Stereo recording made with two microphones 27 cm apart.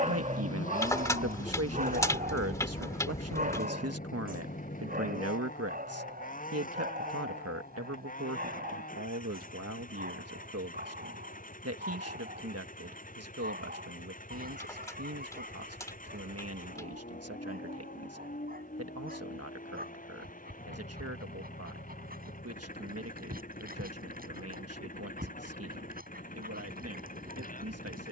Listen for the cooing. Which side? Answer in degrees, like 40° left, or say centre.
10° left.